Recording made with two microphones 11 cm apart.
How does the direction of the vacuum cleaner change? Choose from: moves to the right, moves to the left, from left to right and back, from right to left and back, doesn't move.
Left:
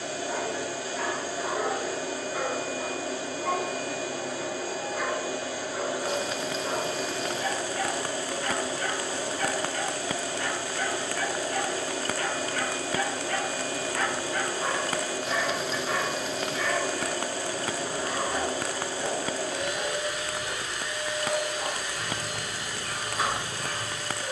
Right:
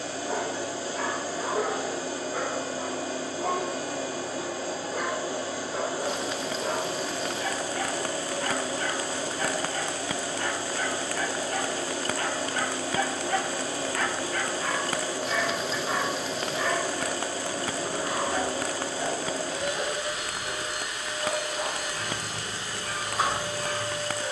doesn't move.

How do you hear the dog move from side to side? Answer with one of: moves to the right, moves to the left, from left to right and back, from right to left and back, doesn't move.
from right to left and back.